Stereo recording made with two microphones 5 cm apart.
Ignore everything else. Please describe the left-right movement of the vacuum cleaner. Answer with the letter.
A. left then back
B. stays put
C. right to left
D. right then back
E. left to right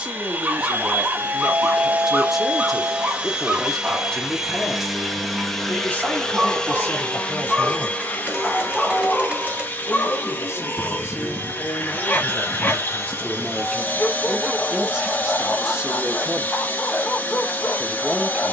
C.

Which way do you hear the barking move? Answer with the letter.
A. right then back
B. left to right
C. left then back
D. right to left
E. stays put
D.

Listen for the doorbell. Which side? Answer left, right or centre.
right.